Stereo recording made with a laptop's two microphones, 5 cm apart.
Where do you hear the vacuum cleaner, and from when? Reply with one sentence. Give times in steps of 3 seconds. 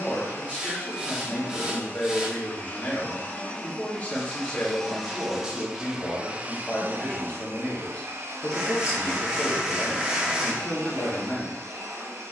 In this clip you hear the vacuum cleaner on the left from 0 s, in the centre from 3 s and on the right from 6 s.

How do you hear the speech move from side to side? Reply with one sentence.
You can hear the speech stay in one place.